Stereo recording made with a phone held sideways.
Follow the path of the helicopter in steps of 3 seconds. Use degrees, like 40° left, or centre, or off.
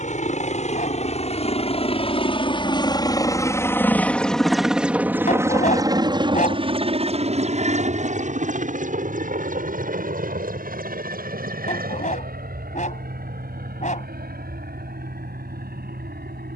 50° left, centre, 40° right, 60° right, 70° right, 80° right.